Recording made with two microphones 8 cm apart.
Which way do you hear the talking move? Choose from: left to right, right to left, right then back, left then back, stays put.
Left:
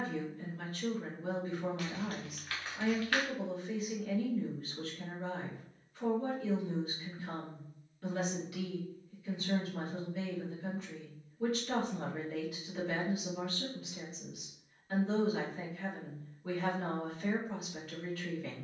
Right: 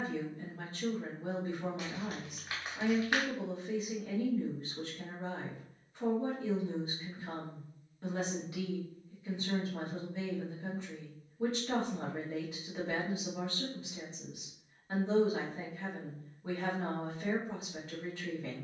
stays put.